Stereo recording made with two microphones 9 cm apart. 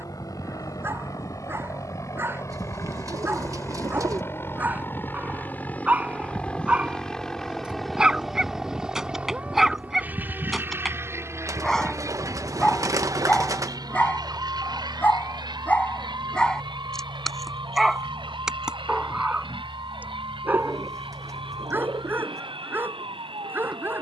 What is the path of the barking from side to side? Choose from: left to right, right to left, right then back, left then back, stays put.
left then back.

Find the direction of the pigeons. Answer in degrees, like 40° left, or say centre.
40° right.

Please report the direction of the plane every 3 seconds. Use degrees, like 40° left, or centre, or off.
40° left, 30° left, centre, 20° right, 50° right, 60° right, 70° right, 70° right.